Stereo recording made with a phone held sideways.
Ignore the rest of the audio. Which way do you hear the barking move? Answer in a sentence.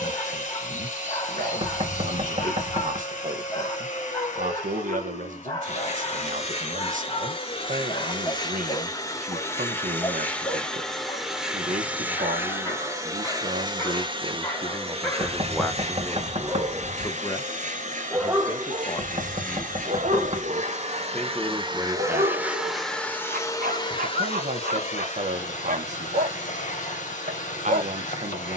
In this clip you hear the barking travel towards the right.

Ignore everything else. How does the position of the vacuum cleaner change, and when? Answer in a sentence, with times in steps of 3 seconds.
In this clip you hear the vacuum cleaner on the left from 0 s, in the centre from 9 s, on the right from 12 s, in the centre from 21 s and on the left from 24 s.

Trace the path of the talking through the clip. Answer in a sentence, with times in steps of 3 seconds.
You can hear the talking on the right from 0 s, in the centre from 15 s, on the left from 18 s, in the centre from 21 s and on the right from 24 s.